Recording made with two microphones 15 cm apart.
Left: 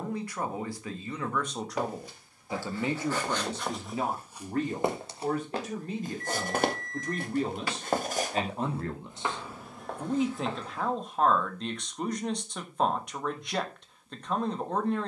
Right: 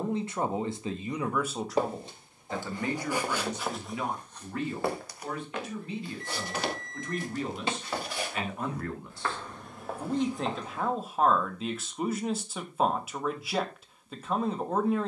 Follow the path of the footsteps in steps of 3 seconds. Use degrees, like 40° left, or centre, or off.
20° right, 10° left, 50° left, centre, off.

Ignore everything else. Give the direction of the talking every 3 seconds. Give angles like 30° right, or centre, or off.
10° right, 40° left, 40° left, centre, 10° right.